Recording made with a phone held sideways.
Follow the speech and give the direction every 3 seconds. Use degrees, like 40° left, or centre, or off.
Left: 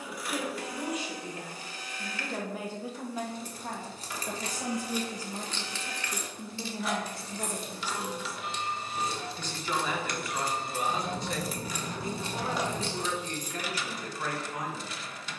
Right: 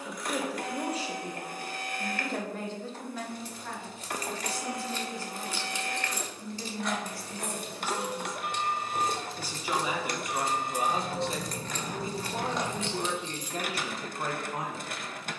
20° right, 30° left, 20° left, 20° right, 30° right.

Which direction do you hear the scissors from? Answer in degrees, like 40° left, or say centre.
centre.